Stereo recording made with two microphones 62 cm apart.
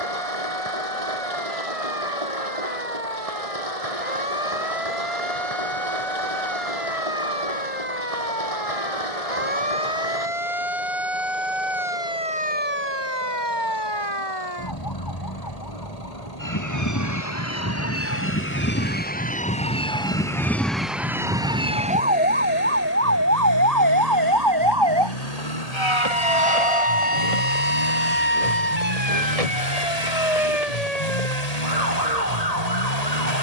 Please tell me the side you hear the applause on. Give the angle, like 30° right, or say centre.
60° right.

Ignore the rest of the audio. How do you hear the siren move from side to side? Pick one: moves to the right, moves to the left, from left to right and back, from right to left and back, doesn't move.
moves to the right.